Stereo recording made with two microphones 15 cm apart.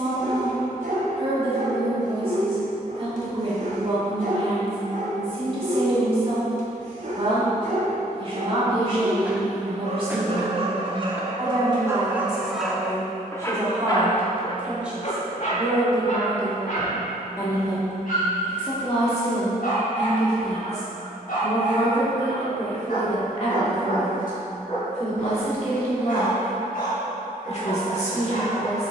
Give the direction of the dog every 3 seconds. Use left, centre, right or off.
right, right, right, right, centre, left, left, left, left, left.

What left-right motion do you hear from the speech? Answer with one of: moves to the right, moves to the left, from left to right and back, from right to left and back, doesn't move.
moves to the left.